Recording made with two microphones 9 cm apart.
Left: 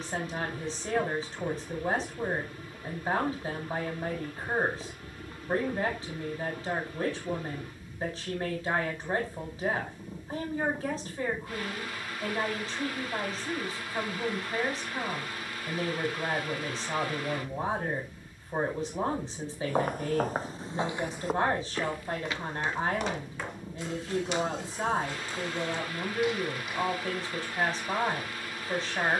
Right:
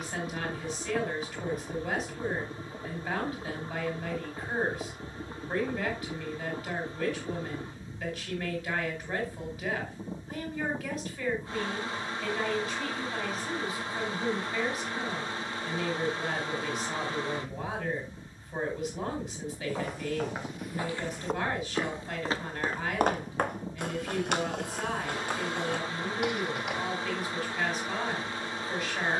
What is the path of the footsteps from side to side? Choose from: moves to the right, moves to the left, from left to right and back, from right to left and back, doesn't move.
moves to the right.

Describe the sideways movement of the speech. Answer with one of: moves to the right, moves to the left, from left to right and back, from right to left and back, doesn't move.
doesn't move.